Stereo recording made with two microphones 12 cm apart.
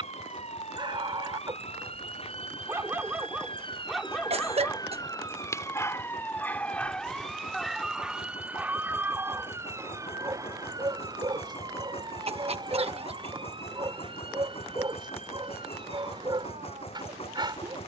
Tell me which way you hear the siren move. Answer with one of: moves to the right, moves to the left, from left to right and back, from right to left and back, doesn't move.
moves to the right.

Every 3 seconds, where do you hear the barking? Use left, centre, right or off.
right, centre, centre, right, right, right.